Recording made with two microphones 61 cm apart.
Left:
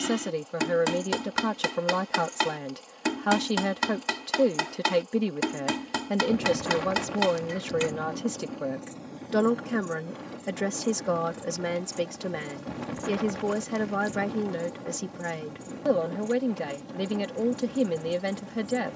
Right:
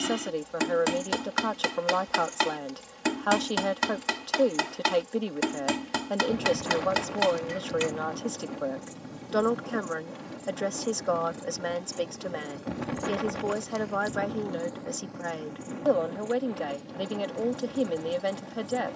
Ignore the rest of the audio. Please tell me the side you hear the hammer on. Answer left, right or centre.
centre.